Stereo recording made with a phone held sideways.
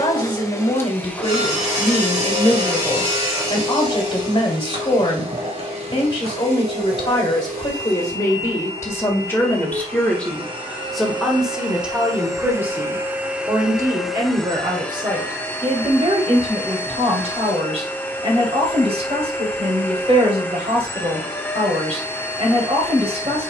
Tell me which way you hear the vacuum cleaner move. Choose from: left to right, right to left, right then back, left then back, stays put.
right then back.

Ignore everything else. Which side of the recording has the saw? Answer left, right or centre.
right.